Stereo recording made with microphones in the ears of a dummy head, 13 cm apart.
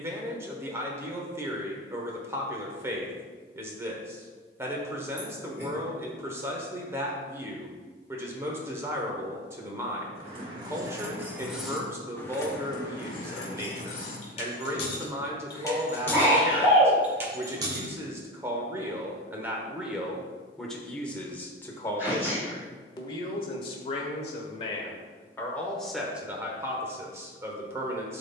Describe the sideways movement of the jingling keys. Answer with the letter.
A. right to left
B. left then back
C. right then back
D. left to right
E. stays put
B.